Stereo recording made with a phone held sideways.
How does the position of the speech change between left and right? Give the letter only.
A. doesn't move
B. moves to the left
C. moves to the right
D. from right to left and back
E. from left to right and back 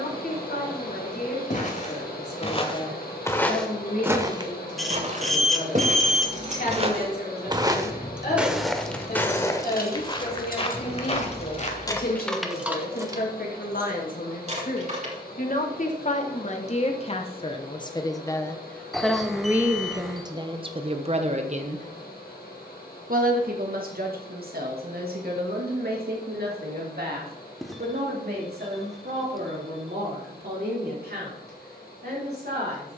C.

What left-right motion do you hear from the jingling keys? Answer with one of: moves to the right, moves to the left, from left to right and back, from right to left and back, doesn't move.
from right to left and back.